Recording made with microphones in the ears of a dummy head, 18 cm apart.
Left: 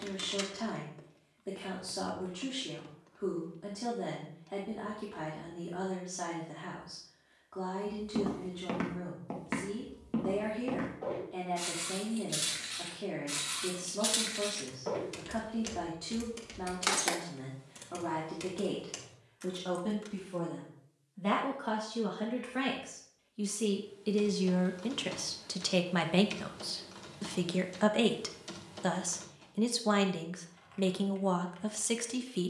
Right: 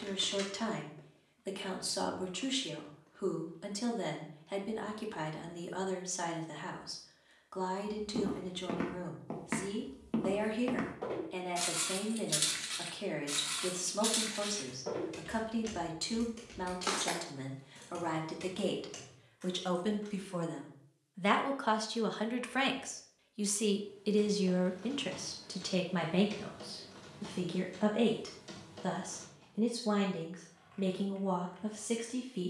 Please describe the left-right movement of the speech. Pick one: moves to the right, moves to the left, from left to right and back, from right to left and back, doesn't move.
moves to the left.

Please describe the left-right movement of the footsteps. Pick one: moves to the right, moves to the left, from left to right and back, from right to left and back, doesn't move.
from left to right and back.